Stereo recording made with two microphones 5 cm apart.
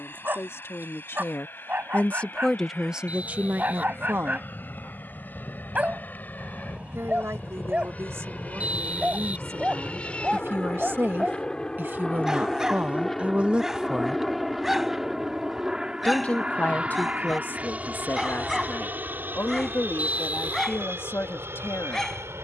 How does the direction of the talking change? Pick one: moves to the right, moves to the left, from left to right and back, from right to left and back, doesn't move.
from left to right and back.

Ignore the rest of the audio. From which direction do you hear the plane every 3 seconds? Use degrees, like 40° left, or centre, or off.
50° left, 50° left, 40° left, 20° left, centre, 20° right, 40° right, 60° right.